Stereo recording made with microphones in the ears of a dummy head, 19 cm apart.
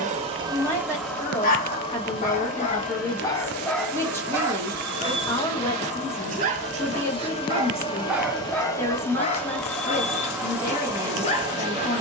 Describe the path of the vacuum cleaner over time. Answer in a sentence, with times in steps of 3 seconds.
You can hear the vacuum cleaner in the centre from 0 s, on the left from 3 s and in the centre from 9 s.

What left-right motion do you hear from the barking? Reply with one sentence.
You can hear the barking go right and come back.